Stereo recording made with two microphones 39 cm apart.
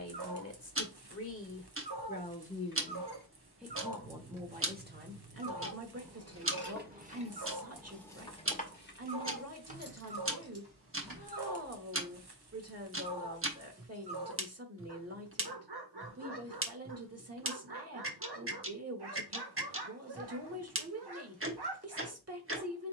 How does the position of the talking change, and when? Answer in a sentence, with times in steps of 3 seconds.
You can hear the talking on the left from 0 s and on the right from 3 s.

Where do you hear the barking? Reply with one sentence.
You can hear the barking on the right.